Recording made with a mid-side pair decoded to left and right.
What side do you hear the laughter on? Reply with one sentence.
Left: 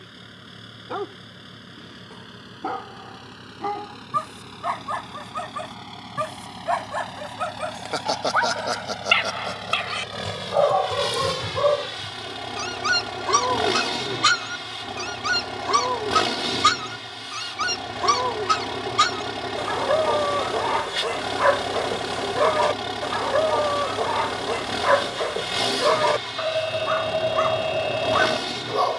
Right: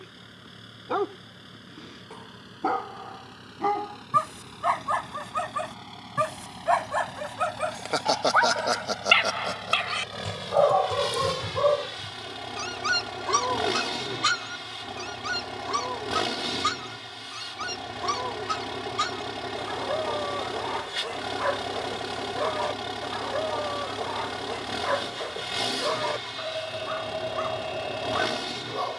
You can hear the laughter in the centre.